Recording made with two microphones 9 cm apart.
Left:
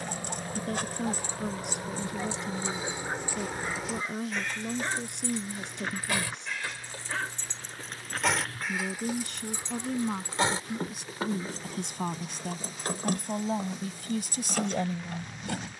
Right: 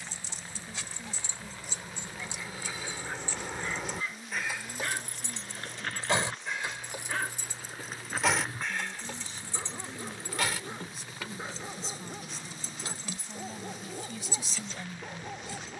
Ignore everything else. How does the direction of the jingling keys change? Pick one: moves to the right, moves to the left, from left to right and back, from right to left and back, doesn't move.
from left to right and back.